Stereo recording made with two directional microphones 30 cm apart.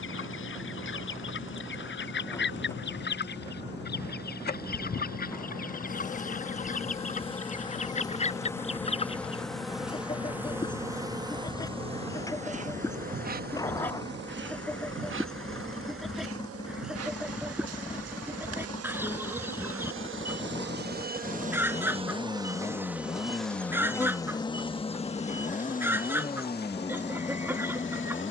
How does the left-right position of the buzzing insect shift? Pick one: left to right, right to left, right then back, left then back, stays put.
right then back.